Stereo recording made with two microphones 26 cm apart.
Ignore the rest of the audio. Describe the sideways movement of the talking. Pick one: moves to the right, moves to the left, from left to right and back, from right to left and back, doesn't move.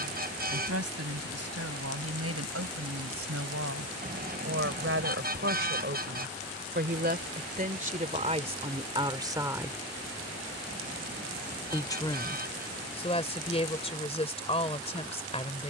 moves to the left.